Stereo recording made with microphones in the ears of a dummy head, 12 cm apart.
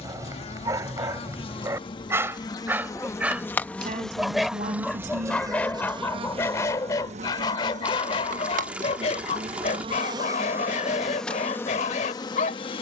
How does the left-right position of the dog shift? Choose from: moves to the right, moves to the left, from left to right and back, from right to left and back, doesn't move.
moves to the left.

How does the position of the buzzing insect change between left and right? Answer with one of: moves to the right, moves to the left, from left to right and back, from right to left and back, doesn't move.
from left to right and back.